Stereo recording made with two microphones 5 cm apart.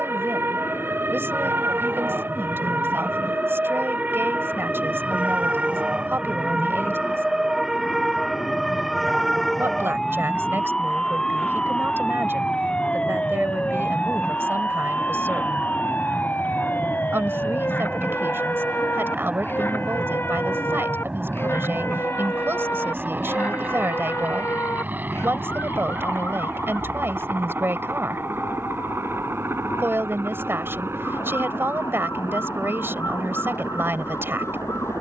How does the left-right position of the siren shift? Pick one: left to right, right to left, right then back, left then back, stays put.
right to left.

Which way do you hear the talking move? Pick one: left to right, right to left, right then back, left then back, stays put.
stays put.